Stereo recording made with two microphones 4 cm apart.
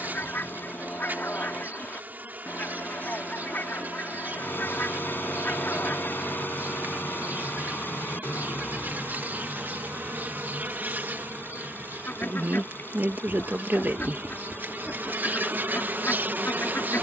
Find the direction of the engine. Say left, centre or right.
left.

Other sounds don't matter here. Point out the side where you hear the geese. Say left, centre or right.
left.